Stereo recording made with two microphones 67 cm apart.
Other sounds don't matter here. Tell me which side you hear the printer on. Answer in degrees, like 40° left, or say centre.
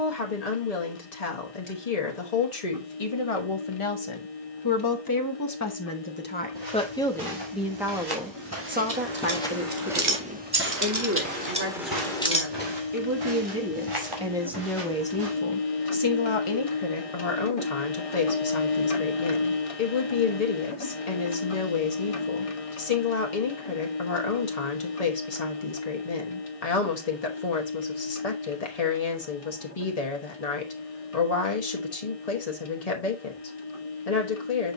50° left.